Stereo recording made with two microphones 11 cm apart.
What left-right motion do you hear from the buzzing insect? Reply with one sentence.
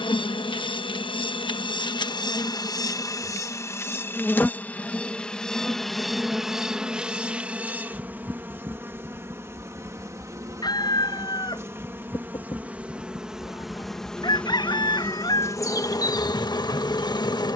In this clip you hear the buzzing insect go right and come back.